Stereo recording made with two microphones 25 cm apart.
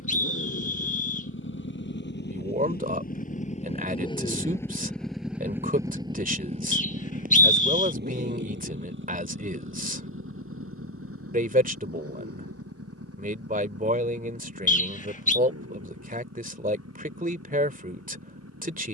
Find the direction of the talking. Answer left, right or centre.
right.